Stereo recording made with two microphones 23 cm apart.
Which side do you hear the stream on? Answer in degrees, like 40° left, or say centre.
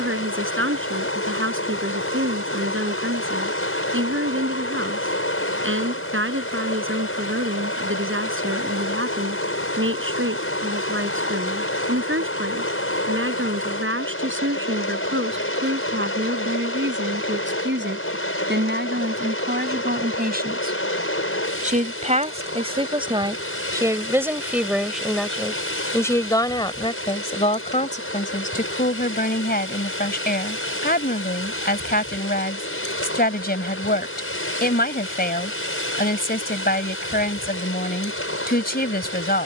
70° left.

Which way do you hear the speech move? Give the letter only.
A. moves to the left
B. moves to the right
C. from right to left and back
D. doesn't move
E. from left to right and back
A.